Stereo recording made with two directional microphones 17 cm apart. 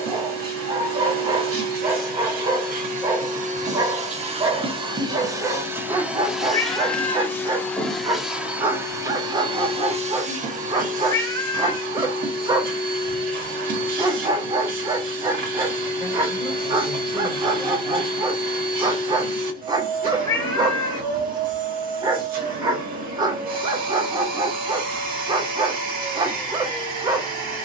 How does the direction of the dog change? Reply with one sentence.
In this clip you hear the dog stay in one place.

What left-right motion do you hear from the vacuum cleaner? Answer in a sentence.
In this clip you hear the vacuum cleaner go left and come back.